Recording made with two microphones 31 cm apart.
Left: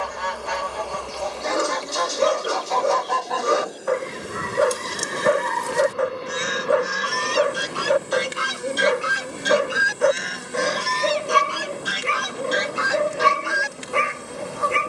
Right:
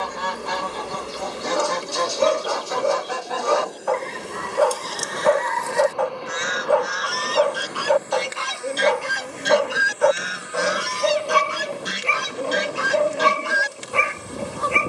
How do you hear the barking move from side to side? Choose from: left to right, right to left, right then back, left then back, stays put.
stays put.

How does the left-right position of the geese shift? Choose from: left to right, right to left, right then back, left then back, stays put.
left then back.